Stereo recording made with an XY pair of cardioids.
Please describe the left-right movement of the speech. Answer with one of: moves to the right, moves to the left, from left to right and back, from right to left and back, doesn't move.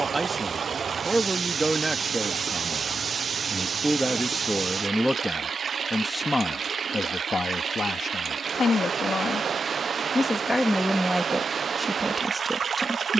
from right to left and back.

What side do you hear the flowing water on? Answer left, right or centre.
right.